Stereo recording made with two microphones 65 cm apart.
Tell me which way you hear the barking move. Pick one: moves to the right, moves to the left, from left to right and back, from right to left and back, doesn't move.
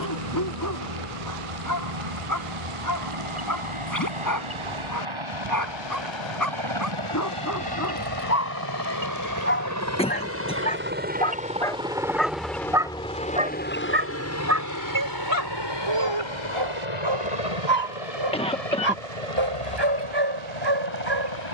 moves to the right.